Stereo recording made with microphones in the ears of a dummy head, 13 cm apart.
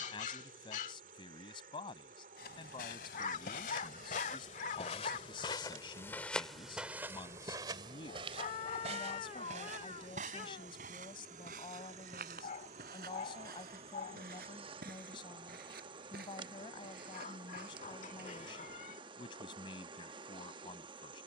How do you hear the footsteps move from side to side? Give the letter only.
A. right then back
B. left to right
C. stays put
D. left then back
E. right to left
B.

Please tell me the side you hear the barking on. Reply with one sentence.
You can hear the barking on the left.